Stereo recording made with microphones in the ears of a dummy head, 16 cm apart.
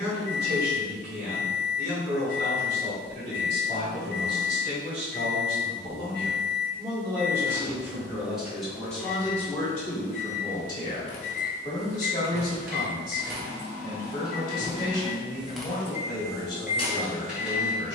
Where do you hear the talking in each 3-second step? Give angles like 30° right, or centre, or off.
60° right, 40° right, 10° right, 20° left, 30° left, 30° left.